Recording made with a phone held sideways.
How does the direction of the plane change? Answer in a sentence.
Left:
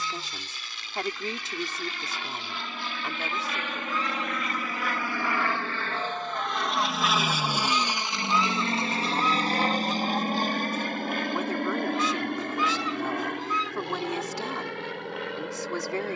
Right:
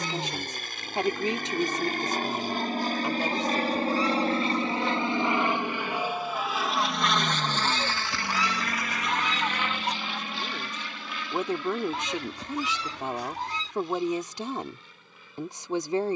You can hear the plane move to the left.